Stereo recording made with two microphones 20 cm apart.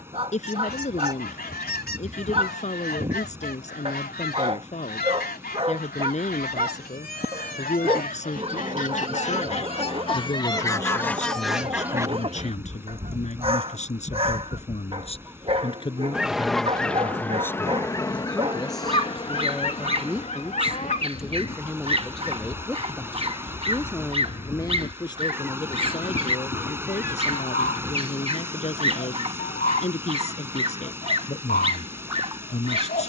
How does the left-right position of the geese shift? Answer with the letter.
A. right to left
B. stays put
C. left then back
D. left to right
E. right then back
E.